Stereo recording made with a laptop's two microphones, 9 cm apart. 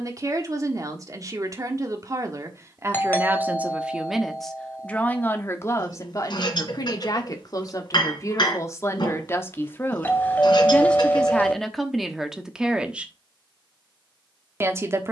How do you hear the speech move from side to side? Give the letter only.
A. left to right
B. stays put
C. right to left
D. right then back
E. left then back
E.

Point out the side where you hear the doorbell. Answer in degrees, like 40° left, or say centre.
20° left.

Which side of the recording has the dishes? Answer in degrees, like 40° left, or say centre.
60° left.